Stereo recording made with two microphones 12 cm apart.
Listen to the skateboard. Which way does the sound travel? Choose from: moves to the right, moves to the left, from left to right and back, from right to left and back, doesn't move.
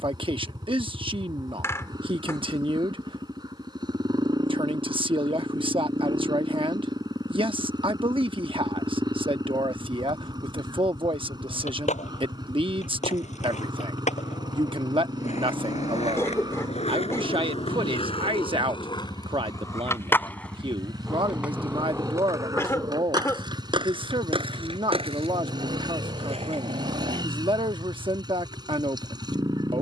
moves to the right.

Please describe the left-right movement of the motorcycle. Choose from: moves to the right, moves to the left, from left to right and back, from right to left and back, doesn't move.
doesn't move.